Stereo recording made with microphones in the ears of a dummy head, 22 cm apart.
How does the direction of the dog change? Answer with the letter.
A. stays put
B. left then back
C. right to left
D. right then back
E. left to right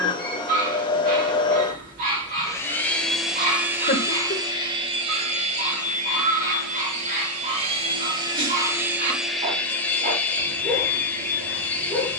A.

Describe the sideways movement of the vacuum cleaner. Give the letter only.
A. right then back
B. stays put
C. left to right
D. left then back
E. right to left
A.